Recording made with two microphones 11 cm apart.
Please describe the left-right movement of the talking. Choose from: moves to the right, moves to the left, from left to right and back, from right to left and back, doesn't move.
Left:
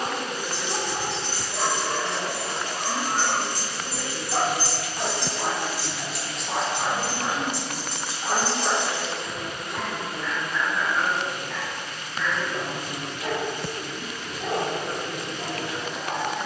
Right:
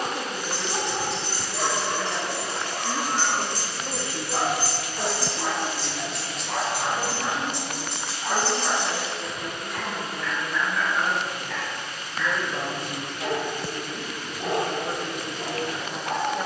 from right to left and back.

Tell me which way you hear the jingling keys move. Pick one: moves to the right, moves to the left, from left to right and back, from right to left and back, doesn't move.
moves to the right.